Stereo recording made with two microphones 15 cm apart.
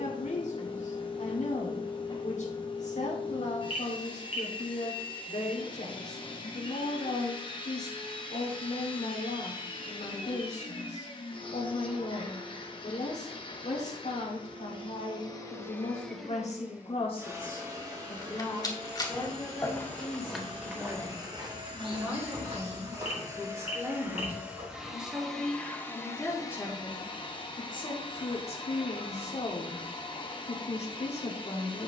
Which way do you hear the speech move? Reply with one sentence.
You can hear the speech go right and come back.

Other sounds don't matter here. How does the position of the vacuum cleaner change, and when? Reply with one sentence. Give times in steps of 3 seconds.
In this clip you hear the vacuum cleaner on the left from 0 s, in the centre from 15 s, on the right from 18 s, in the centre from 24 s and on the left from 27 s.